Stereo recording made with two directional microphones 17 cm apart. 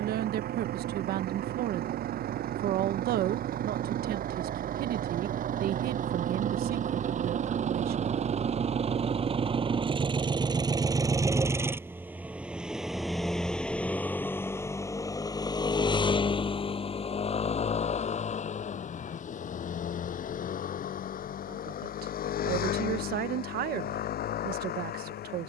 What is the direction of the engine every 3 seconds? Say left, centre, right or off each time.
right, right, right, right, centre, left, left, left, left.